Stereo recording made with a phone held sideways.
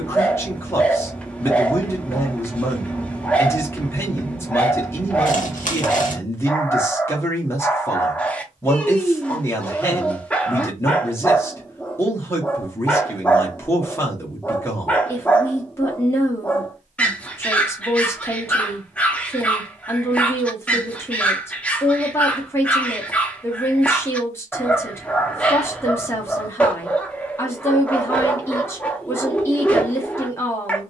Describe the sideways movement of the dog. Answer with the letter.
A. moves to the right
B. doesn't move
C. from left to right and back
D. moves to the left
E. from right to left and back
B.